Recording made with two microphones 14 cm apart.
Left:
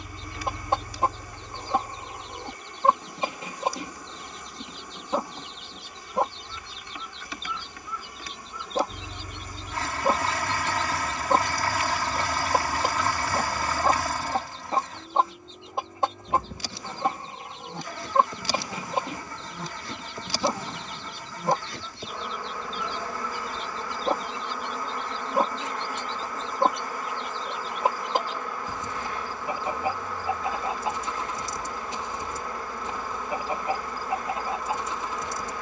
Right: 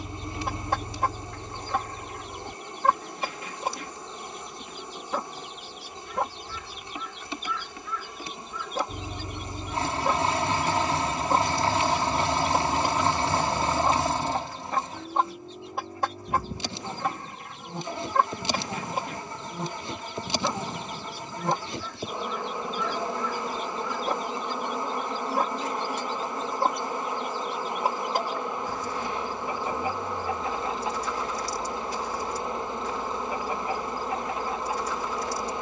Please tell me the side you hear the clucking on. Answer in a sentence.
You can hear the clucking on the left.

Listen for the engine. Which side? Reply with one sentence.
In this clip you hear the engine on the right.